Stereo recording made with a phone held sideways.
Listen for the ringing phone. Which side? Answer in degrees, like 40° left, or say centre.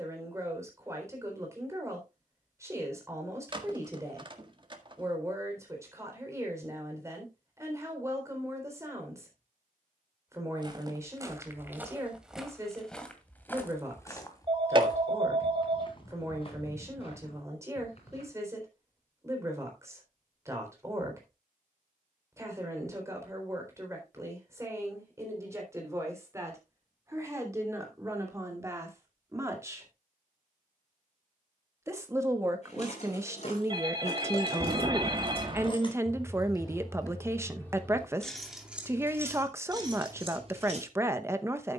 40° right.